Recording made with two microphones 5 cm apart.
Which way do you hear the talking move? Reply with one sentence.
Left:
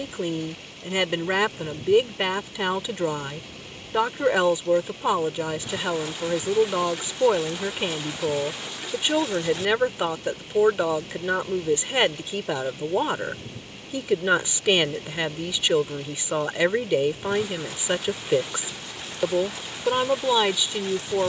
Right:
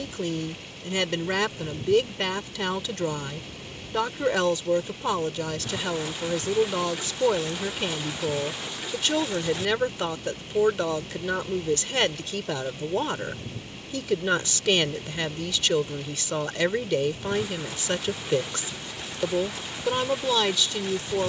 You can hear the talking stay put.